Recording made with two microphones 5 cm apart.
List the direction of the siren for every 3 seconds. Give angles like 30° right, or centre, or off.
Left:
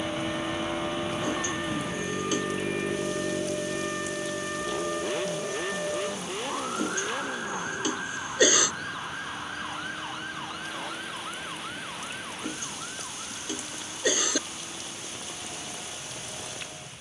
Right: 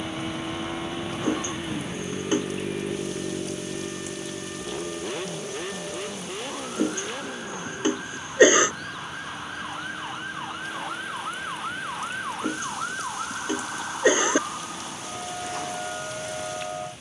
50° left, 40° left, 20° left, 20° right, 50° right, 60° right.